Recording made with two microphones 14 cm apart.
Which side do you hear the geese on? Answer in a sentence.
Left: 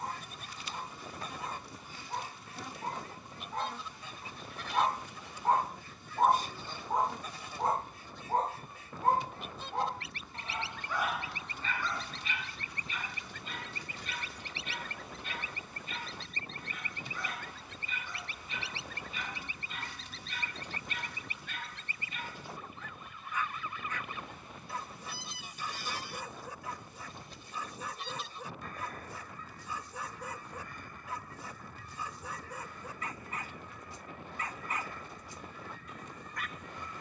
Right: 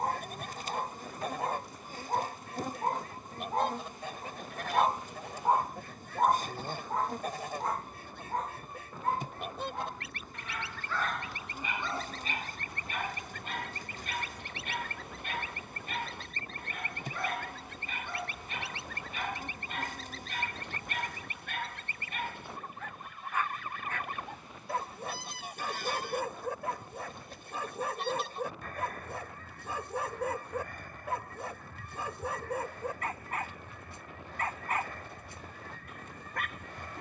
In this clip you hear the geese on the right.